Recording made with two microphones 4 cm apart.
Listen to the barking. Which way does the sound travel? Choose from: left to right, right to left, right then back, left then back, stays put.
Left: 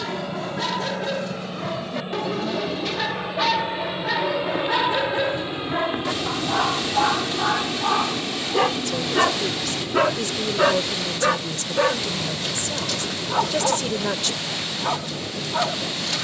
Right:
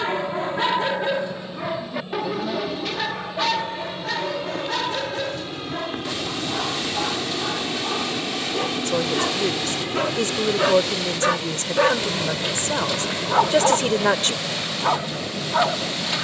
left then back.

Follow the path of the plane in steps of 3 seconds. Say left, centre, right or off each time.
left, left, centre, right, right, right.